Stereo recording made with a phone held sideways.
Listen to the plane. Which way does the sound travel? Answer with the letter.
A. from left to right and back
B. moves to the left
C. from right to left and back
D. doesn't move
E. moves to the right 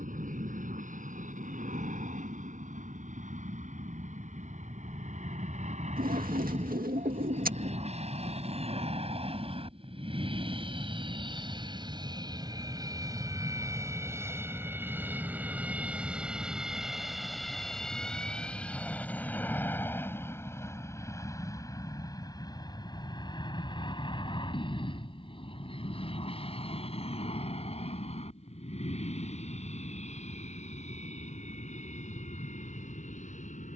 B.